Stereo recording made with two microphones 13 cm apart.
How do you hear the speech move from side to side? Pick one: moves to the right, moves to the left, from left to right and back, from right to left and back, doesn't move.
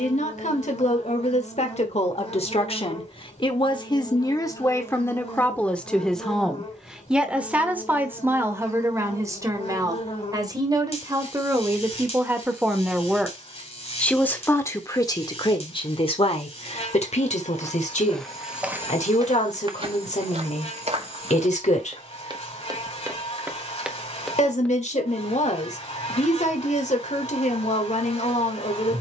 from left to right and back.